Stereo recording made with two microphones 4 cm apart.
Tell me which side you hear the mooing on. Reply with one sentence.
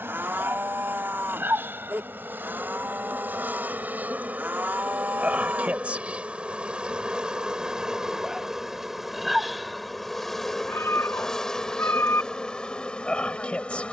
In this clip you hear the mooing on the right.